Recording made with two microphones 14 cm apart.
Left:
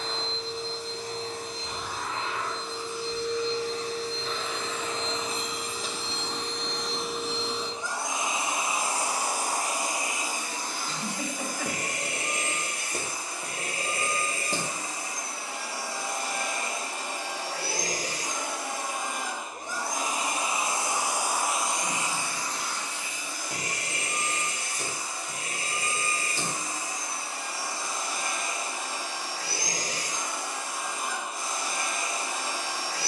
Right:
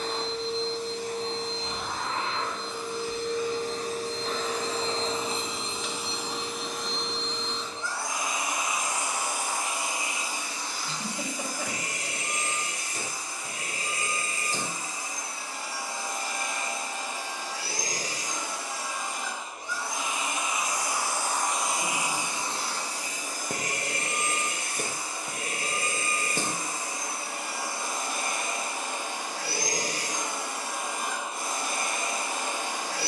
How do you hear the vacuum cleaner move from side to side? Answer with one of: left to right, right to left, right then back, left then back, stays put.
left then back.